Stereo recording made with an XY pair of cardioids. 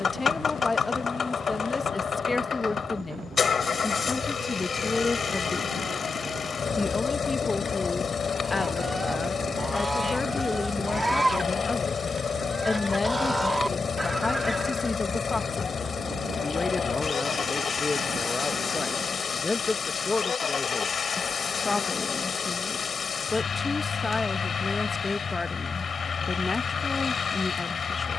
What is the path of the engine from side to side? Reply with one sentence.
You can hear the engine stay put.